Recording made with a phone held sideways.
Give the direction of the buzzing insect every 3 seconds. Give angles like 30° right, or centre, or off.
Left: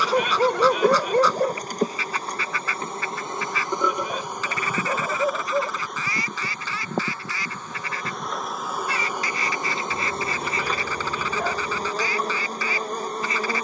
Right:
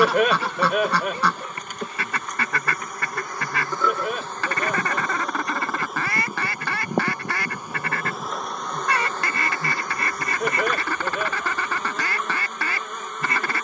30° left, 10° left, 10° right, 30° left, 30° left.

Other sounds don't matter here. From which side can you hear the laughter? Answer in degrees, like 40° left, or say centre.
70° right.